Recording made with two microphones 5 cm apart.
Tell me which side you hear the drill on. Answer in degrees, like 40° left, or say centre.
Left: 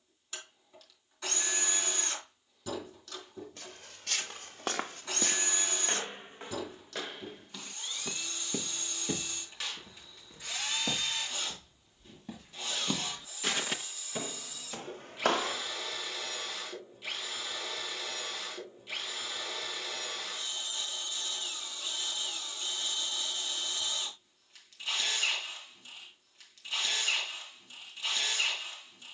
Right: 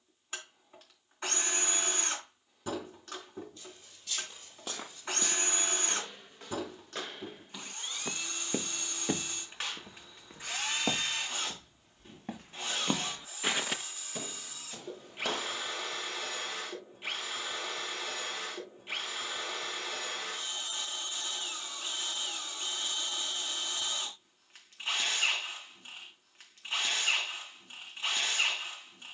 30° right.